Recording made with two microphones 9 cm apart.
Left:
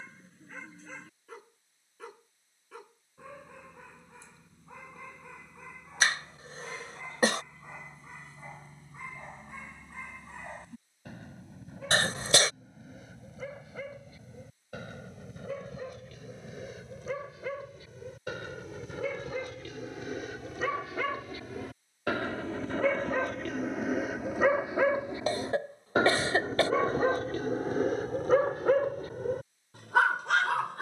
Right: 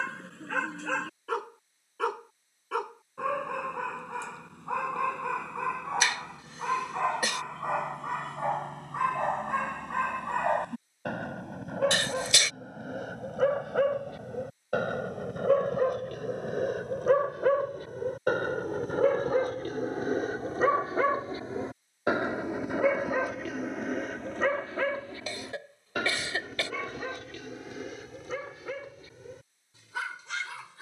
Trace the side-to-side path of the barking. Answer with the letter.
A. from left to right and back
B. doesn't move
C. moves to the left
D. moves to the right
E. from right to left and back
C.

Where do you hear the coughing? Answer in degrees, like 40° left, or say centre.
40° left.